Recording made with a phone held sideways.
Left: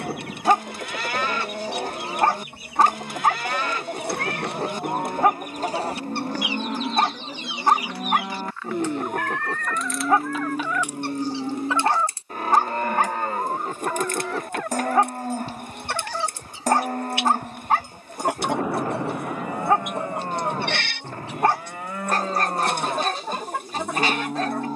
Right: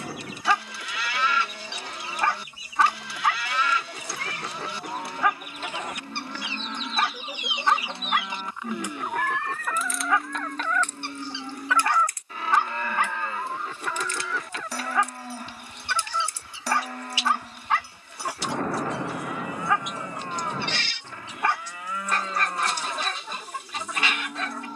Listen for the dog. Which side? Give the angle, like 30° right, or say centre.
40° left.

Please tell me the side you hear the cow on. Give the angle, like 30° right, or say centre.
40° left.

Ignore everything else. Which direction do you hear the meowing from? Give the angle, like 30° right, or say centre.
60° left.